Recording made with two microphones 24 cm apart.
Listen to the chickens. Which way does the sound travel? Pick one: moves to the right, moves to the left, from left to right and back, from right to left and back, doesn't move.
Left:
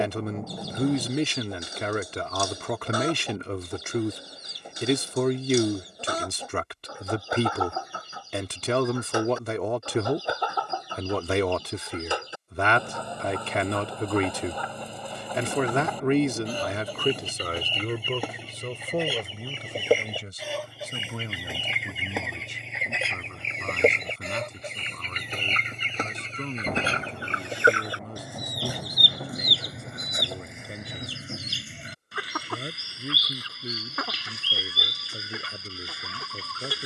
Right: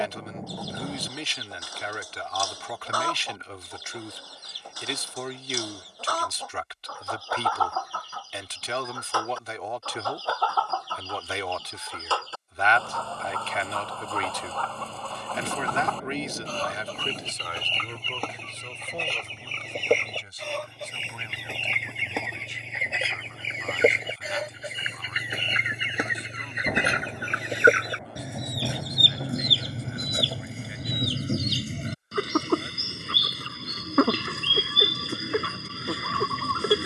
moves to the right.